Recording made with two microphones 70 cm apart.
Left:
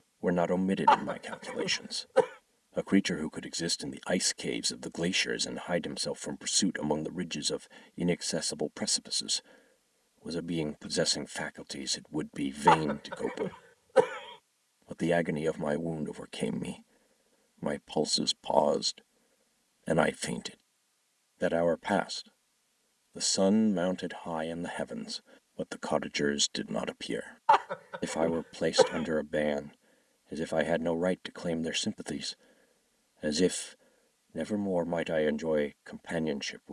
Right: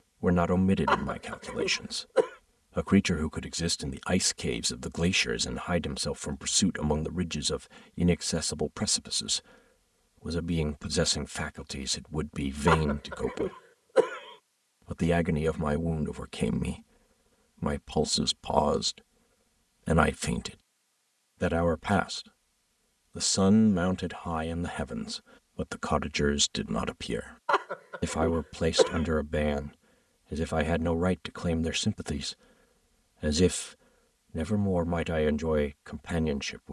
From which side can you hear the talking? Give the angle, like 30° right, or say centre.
40° right.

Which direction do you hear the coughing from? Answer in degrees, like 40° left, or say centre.
30° left.